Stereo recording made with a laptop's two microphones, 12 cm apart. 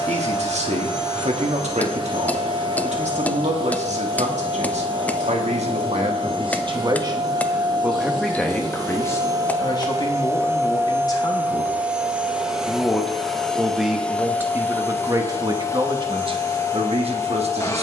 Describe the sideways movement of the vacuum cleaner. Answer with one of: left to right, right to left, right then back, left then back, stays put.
right to left.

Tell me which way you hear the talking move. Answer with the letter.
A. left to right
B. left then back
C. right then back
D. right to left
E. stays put
B.